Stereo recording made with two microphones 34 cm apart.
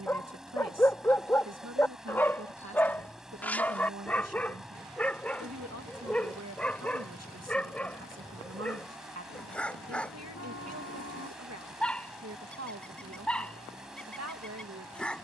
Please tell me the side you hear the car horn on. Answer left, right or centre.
left.